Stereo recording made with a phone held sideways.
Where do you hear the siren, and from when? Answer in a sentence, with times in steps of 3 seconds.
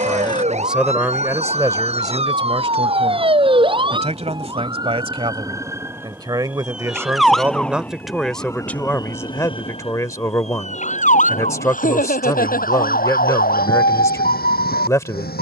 You can hear the siren on the right from 0 s, in the centre from 6 s and on the left from 9 s.